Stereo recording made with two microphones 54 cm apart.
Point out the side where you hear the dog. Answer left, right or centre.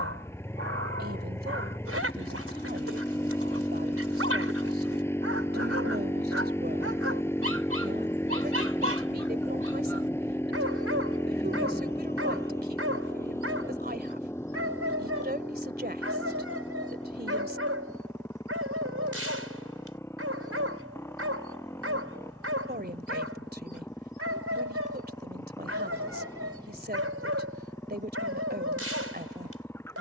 right.